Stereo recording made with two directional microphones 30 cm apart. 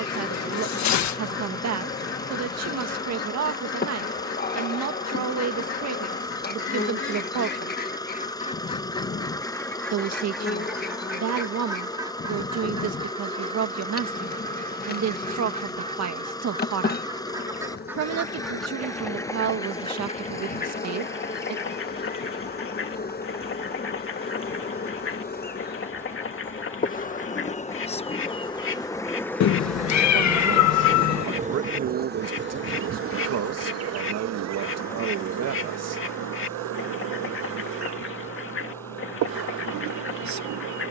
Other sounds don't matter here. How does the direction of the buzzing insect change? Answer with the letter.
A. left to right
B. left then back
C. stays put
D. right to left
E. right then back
A.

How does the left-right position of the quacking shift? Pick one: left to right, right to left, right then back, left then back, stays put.
right then back.